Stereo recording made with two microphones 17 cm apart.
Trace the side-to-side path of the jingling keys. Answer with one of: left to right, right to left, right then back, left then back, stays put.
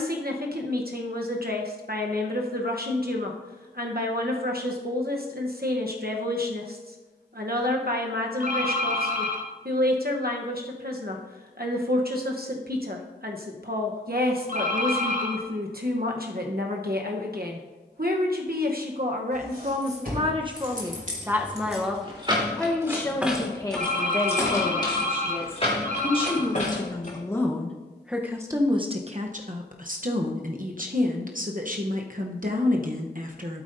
right to left.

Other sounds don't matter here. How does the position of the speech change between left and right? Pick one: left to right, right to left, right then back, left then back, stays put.
left then back.